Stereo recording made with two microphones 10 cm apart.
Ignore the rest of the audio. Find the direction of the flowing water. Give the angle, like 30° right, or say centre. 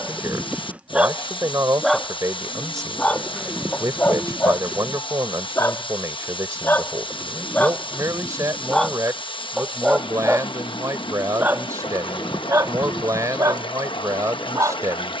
60° left.